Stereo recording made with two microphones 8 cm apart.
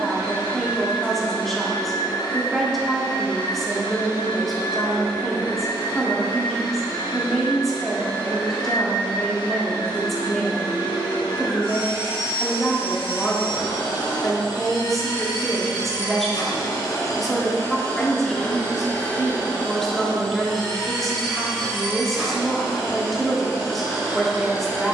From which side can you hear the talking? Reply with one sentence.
You can hear the talking in the centre.